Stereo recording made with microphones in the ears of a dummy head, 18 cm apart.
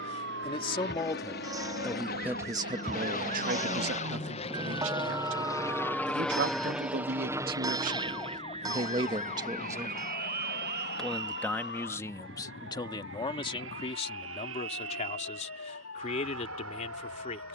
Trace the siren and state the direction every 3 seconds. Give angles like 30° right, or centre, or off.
50° right, 20° right, 10° left, 40° left, 50° left, 60° left.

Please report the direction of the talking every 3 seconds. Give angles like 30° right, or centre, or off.
10° left, 60° right, 50° right, 10° right, 30° left, 40° left.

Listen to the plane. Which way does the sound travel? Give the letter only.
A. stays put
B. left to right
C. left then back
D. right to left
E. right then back
B.